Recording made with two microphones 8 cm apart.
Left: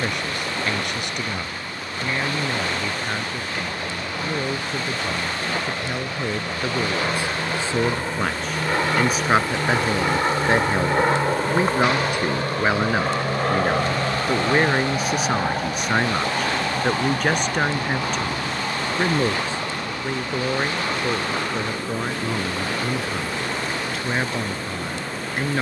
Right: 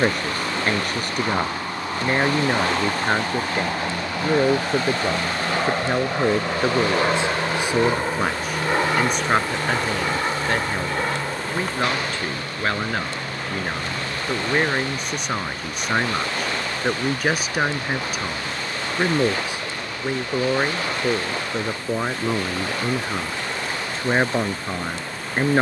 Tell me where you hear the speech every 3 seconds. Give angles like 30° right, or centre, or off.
40° right, 40° right, 20° right, 10° left, 10° left, centre, 10° right, 20° right, 30° right.